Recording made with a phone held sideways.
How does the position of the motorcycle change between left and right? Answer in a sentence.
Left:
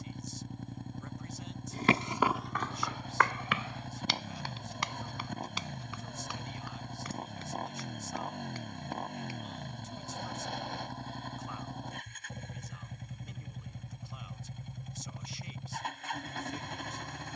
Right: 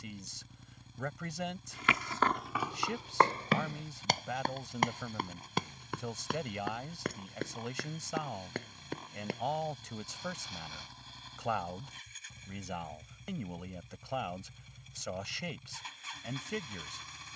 In this clip you hear the motorcycle stay in one place.